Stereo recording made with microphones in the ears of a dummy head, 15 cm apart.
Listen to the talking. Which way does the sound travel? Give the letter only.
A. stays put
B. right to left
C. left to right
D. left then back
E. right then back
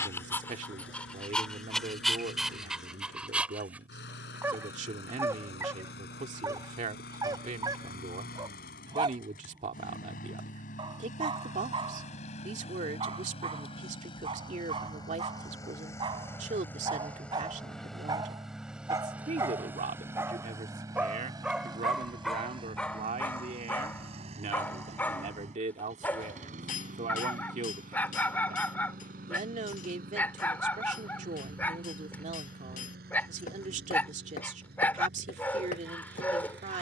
A.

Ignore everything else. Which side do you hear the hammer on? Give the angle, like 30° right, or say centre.
50° left.